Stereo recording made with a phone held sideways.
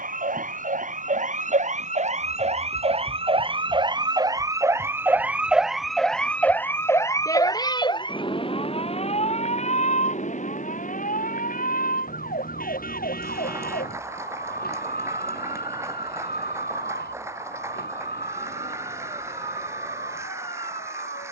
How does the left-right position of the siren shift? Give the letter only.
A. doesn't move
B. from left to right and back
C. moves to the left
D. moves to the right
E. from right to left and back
C.